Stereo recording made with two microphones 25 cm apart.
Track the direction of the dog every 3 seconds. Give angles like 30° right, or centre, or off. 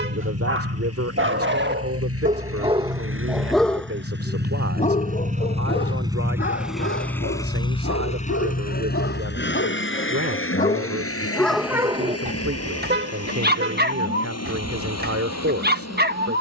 40° right, 20° left, 50° left, 30° left, 40° right, 40° right.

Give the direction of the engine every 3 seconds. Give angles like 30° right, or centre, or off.
60° right, 40° right, 10° left, 50° left, 70° left, 70° left.